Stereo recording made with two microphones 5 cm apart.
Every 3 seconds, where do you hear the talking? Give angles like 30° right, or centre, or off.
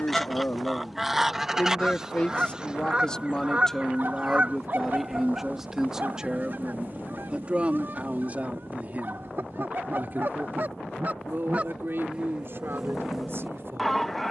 30° left, centre, 20° right, 40° right, 50° right.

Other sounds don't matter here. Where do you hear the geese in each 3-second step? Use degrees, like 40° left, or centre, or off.
10° right, 30° right, 40° right, 40° right, 10° right.